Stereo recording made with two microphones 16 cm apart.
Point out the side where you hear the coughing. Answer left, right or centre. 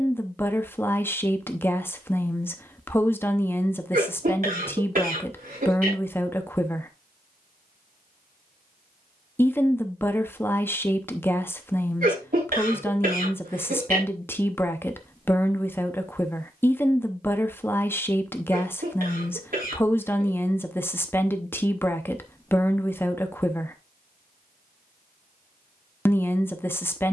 right.